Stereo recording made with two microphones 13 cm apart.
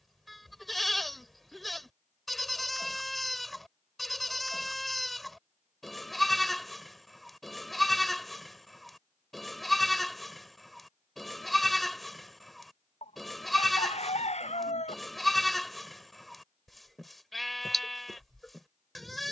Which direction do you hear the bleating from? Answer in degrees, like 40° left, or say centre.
centre.